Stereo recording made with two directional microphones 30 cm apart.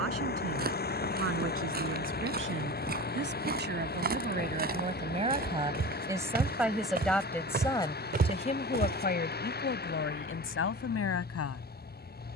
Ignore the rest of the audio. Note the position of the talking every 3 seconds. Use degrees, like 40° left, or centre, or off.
50° right, 30° right, 10° left, 40° left.